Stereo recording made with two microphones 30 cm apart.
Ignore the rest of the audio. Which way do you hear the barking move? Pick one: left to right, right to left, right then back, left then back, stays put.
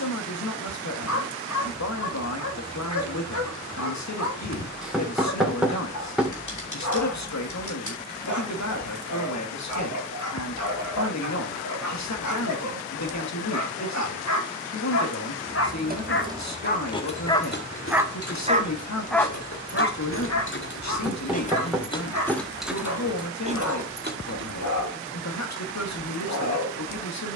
right then back.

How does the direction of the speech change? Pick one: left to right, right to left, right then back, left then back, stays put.
stays put.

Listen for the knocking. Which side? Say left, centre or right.
centre.